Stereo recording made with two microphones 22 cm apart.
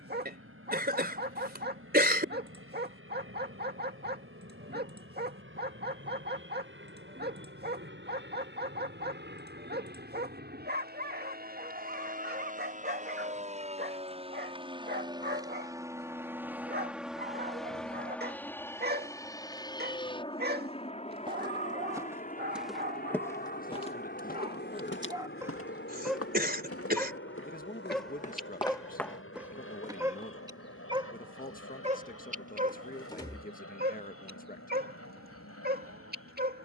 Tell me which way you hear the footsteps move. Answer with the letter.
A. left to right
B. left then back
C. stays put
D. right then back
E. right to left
B.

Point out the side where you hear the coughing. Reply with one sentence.
In this clip you hear the coughing on the right.